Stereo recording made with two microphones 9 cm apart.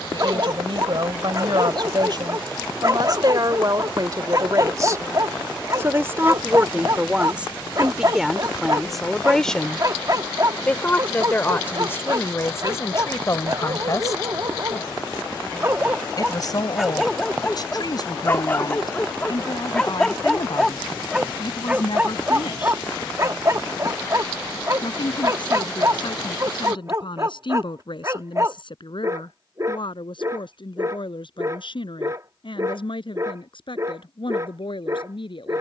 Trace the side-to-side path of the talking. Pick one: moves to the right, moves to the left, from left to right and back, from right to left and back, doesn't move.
moves to the left.